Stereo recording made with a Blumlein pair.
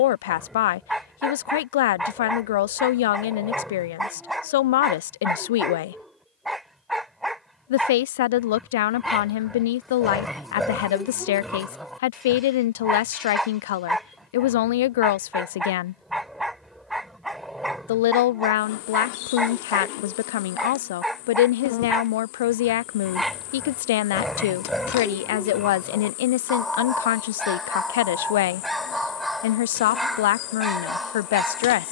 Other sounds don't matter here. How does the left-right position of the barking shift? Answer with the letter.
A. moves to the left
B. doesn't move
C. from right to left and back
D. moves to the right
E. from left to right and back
B.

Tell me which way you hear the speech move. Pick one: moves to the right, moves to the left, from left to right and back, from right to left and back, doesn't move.
doesn't move.